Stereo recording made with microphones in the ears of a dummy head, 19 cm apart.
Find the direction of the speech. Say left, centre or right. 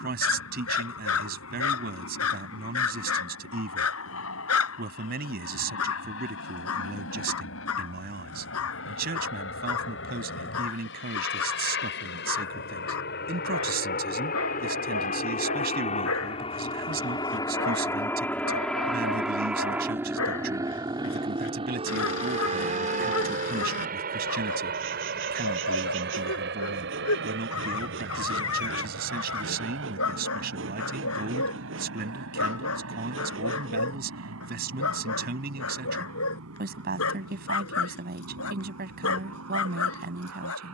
right.